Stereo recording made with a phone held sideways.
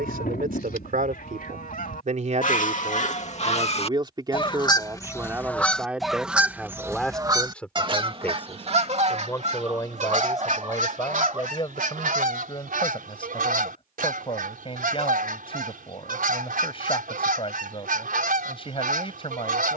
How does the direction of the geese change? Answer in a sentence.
In this clip you hear the geese move from left to right.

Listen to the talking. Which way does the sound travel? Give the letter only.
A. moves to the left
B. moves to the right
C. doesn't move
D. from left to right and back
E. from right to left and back
A.